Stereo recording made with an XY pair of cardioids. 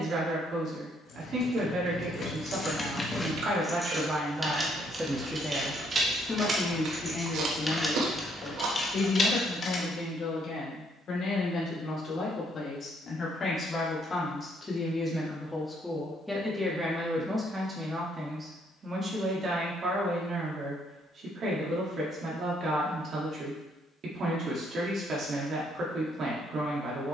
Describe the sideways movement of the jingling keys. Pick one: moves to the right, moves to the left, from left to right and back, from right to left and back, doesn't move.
from left to right and back.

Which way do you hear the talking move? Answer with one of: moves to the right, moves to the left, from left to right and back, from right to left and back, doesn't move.
from right to left and back.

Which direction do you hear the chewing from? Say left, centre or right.
right.